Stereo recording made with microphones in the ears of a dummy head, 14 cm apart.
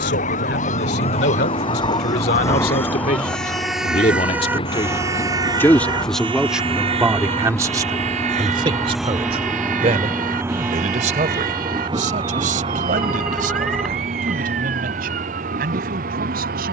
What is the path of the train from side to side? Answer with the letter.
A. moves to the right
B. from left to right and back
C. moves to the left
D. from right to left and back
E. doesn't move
A.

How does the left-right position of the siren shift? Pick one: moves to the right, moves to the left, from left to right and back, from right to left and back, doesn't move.
moves to the right.